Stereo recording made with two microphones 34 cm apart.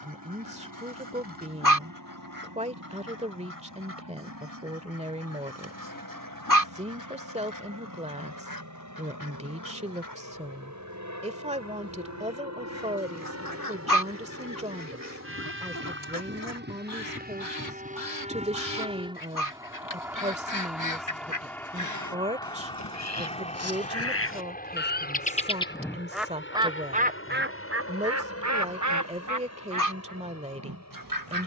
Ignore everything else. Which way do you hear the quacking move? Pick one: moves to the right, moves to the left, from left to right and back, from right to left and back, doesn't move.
moves to the right.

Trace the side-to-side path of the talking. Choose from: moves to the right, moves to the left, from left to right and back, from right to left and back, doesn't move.
doesn't move.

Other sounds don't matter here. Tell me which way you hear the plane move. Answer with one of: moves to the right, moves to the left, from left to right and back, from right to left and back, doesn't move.
moves to the left.